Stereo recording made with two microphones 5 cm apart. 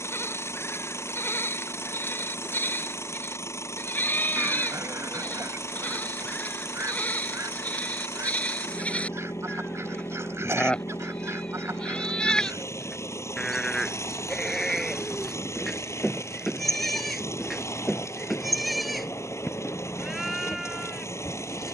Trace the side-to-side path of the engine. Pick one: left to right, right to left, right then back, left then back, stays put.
stays put.